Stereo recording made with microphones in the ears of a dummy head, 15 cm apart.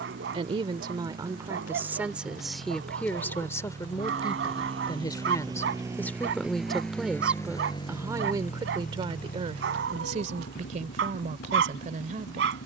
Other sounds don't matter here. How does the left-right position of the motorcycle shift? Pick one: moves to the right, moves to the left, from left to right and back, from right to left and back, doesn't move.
moves to the left.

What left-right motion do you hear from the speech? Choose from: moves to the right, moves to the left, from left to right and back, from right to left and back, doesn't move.
from right to left and back.